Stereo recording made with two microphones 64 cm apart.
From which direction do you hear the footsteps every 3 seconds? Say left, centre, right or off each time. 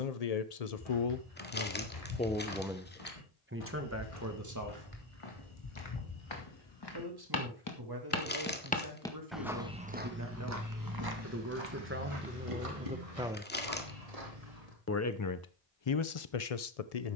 left, left, left, right, right, off.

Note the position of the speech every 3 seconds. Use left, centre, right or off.
left, right, right, right, centre, left.